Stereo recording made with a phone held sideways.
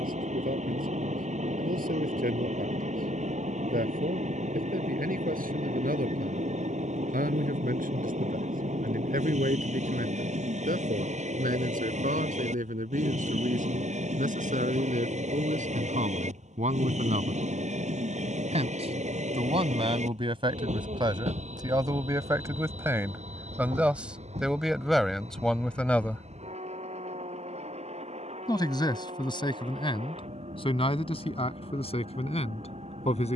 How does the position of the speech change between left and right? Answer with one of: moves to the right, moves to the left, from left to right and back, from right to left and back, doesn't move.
moves to the left.